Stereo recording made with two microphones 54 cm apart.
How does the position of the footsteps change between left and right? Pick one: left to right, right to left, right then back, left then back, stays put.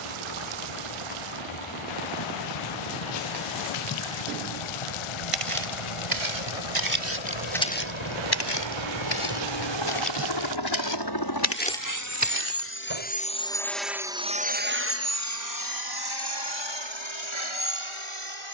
left then back.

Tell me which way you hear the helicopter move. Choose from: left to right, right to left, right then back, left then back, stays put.
left to right.